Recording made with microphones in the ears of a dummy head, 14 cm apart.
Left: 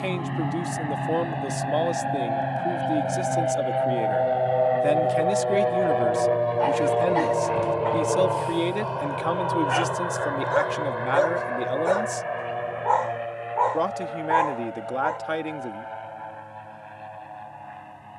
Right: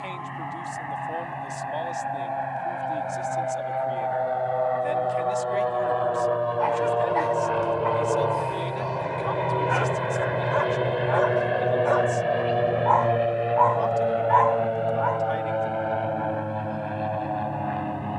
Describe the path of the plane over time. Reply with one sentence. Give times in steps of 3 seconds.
In this clip you hear the plane on the left from 0 s, in the centre from 6 s and on the right from 9 s.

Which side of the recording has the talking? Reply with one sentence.
In this clip you hear the talking on the left.